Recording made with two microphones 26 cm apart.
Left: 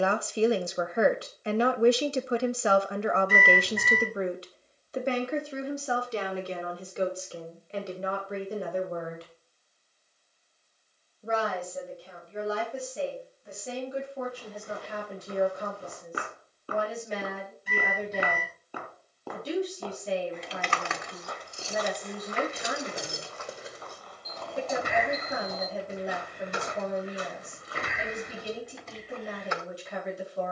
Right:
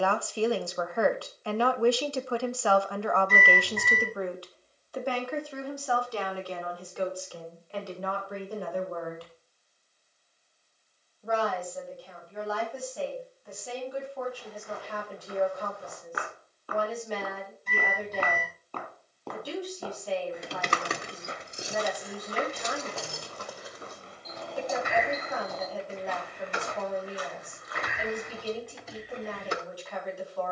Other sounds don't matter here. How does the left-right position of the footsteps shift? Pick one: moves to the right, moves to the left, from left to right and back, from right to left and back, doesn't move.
from left to right and back.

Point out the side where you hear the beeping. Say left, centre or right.
centre.